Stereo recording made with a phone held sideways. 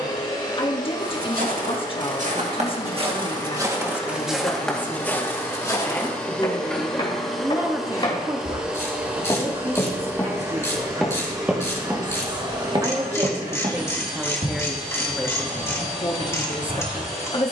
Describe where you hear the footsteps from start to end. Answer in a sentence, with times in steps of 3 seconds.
You can hear the footsteps on the right from 0 s, in the centre from 3 s, on the left from 6 s, in the centre from 9 s, on the right from 12 s and not at all from 15 s.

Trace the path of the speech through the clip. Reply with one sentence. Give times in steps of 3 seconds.
You can hear the speech on the left from 0 s, in the centre from 6 s, on the right from 9 s, in the centre from 12 s and on the left from 15 s.